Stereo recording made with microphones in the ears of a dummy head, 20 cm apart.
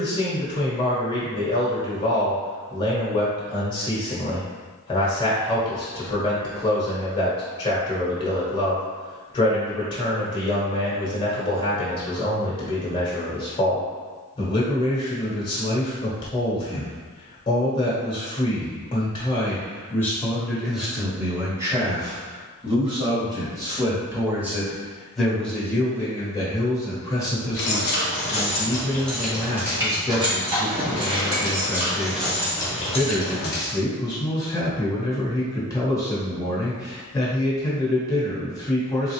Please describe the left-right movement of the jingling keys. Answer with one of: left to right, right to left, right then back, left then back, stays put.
right then back.